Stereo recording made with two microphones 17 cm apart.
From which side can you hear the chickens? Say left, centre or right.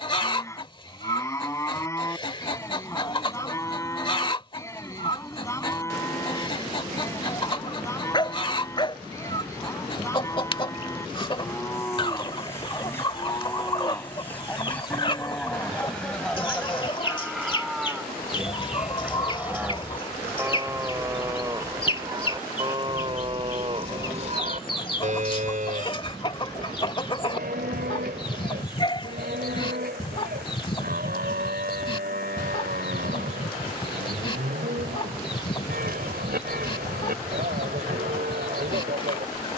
left.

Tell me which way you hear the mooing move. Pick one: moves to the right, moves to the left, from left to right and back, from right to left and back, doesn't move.
moves to the right.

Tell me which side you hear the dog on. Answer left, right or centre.
left.